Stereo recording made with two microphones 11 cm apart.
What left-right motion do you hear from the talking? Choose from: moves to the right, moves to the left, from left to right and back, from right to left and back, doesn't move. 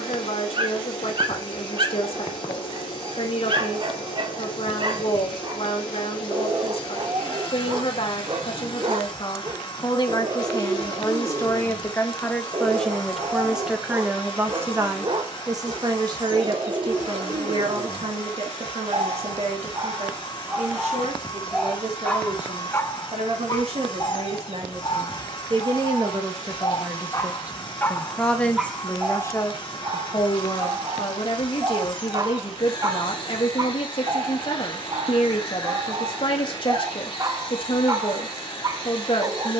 from left to right and back.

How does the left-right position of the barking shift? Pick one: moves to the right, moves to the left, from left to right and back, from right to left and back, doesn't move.
from right to left and back.